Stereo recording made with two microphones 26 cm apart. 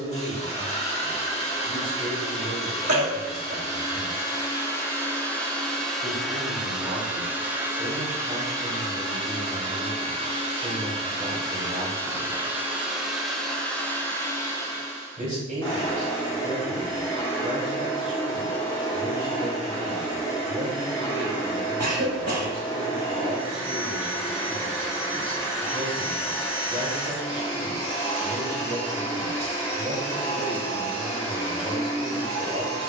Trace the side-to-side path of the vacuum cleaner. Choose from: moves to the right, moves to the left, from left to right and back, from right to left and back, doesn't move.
from left to right and back.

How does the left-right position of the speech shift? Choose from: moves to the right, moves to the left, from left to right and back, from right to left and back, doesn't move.
doesn't move.